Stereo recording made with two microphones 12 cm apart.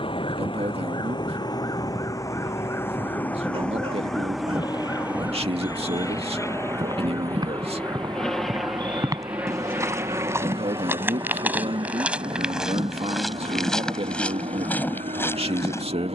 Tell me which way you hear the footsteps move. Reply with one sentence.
You can hear the footsteps travel towards the left.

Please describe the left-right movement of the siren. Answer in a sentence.
You can hear the siren travel towards the right.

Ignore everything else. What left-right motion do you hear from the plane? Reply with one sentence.
In this clip you hear the plane move to the right.